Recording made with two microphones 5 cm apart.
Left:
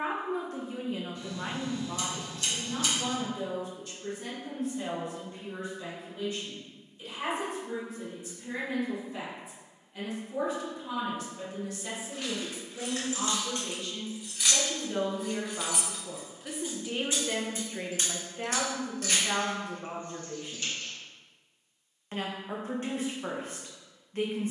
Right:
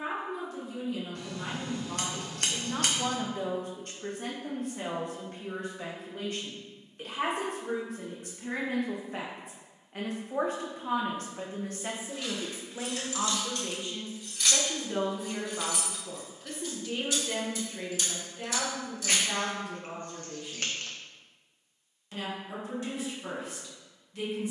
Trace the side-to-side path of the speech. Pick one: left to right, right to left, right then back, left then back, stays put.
right then back.